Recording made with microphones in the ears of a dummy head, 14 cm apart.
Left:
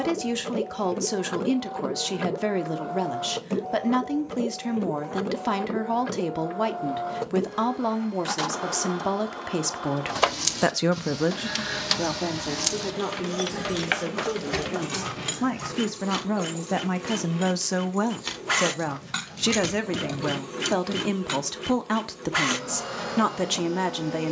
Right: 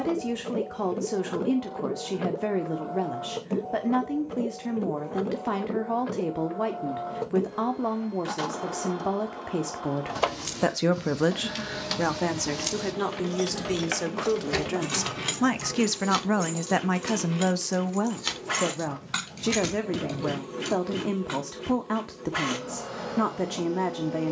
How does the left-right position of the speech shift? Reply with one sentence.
In this clip you hear the speech move from left to right and back again.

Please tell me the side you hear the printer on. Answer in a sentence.
You can hear the printer on the left.